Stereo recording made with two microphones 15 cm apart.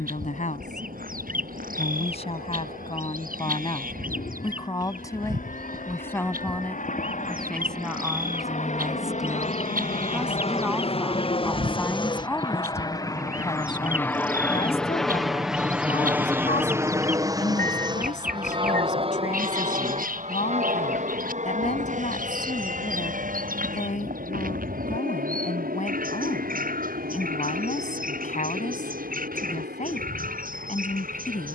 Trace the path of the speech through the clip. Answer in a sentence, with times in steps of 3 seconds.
In this clip you hear the speech on the left from 0 s, in the centre from 6 s and on the left from 12 s.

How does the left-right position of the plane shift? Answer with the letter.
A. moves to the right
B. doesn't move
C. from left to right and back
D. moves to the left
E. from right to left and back
A.